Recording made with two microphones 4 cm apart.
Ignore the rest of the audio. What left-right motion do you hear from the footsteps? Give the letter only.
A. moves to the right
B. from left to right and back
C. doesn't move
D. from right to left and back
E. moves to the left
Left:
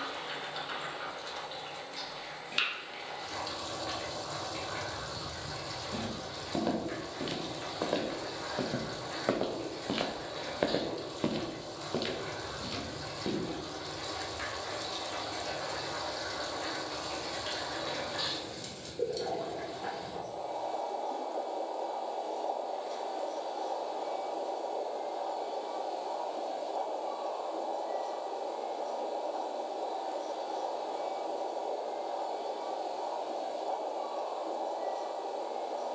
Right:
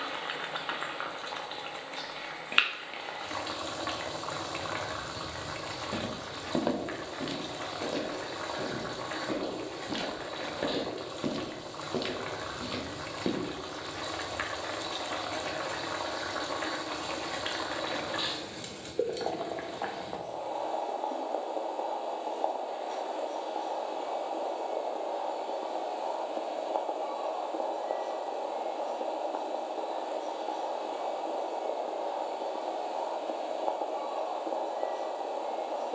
D.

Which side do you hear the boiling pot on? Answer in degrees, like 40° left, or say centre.
40° right.